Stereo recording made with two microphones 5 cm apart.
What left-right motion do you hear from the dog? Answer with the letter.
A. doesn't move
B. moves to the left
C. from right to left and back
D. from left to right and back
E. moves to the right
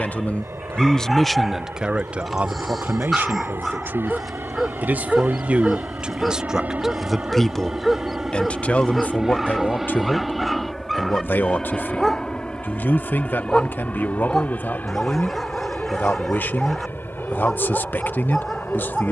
A.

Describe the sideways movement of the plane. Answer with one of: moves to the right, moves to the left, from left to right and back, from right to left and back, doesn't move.
moves to the left.